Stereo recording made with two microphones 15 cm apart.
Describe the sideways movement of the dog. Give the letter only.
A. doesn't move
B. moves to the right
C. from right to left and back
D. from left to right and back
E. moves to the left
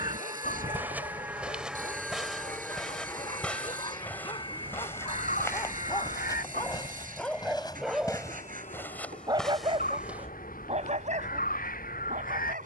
B.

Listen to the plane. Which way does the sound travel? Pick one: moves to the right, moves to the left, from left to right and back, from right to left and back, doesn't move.
moves to the left.